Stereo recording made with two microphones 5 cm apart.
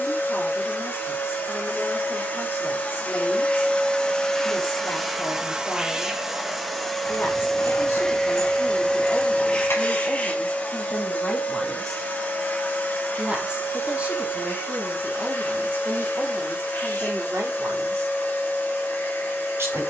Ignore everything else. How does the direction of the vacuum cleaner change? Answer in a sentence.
You can hear the vacuum cleaner go right and come back.